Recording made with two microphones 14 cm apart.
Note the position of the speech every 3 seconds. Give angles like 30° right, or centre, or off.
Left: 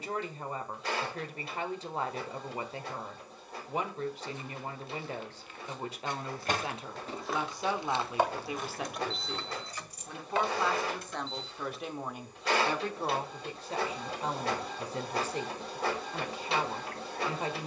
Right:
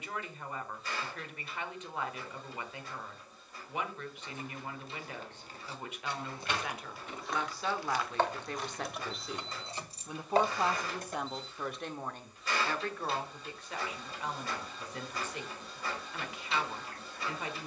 30° left, 30° left, 20° left, 10° right, 30° left, 30° left.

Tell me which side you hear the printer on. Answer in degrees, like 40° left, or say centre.
70° left.